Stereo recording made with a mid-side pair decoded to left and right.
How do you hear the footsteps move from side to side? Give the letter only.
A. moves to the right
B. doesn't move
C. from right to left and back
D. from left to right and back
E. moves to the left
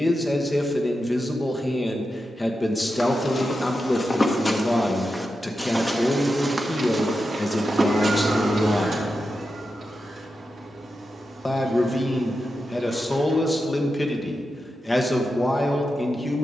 A.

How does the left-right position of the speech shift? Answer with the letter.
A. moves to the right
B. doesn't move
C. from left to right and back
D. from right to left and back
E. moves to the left
B.